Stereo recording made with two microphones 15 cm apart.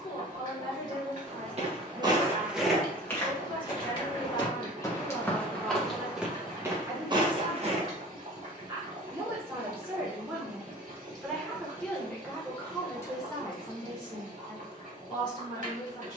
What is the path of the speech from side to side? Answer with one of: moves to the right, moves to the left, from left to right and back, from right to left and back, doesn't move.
from left to right and back.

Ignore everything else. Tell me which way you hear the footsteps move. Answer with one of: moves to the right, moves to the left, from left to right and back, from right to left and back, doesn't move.
from right to left and back.